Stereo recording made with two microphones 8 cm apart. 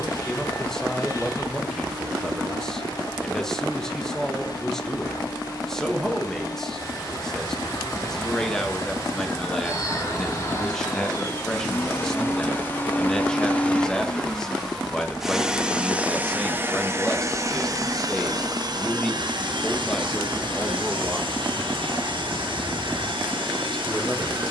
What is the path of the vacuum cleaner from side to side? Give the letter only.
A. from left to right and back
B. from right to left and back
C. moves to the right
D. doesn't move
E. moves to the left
C.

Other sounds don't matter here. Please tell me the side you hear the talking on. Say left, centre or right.
centre.